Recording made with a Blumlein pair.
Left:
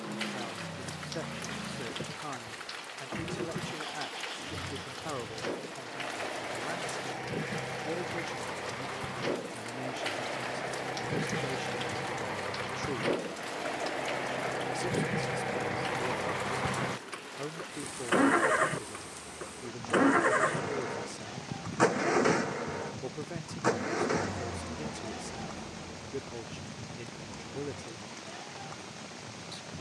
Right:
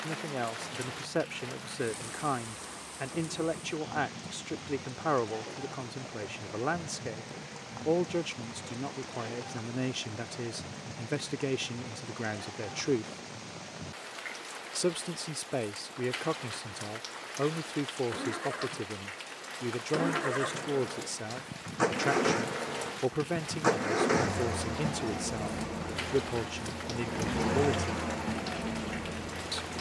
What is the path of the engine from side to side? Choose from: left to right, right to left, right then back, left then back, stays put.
left to right.